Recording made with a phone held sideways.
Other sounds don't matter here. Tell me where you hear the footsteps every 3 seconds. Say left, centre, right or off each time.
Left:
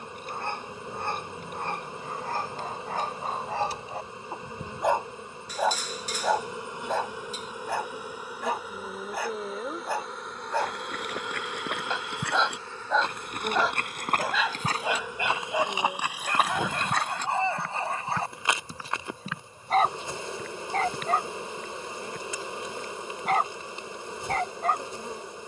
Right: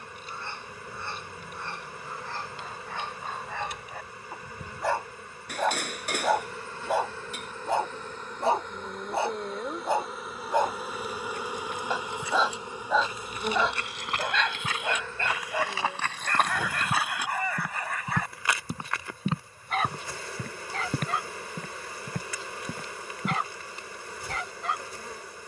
off, off, off, left, left, centre, right, right, off.